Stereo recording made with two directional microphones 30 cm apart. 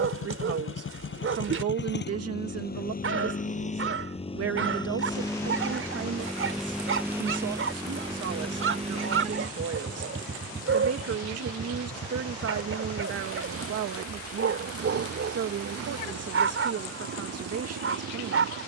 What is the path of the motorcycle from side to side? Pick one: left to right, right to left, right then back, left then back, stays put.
left to right.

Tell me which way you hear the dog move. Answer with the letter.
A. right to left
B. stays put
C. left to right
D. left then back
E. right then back
B.